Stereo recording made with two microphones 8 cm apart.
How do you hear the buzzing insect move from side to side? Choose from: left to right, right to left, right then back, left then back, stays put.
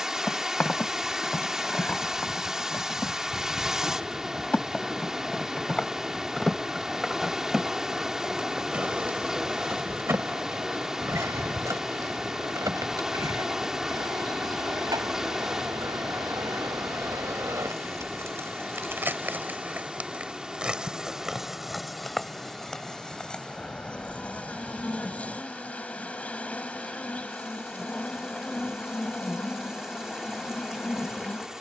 right then back.